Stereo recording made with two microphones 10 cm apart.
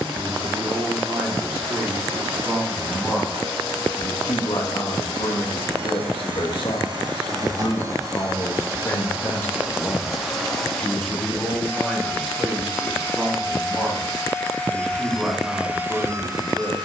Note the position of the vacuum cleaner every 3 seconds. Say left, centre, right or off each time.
right, right, right, centre, left, right.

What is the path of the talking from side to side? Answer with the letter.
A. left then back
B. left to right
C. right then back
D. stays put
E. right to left
A.